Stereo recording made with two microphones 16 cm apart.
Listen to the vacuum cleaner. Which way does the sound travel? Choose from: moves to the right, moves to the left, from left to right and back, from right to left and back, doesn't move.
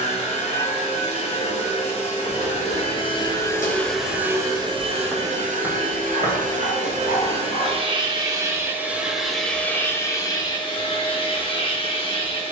from left to right and back.